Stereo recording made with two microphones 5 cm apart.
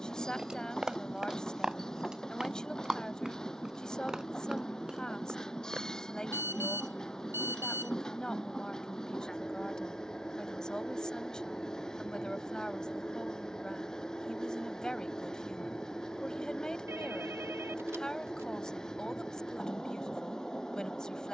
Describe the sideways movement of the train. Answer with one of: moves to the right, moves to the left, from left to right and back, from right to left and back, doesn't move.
doesn't move.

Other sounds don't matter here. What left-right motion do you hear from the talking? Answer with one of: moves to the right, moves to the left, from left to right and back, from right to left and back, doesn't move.
doesn't move.